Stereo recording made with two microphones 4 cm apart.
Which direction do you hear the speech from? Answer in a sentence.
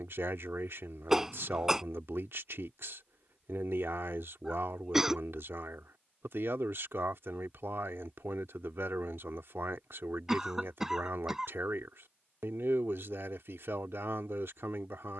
In this clip you hear the speech on the right.